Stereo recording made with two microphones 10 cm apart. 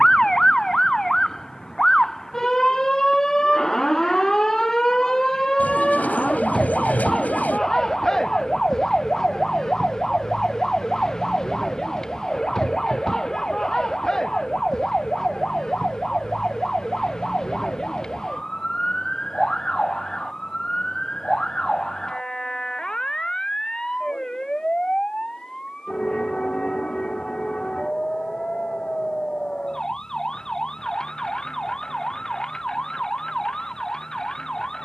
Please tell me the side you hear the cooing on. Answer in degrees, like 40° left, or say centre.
20° left.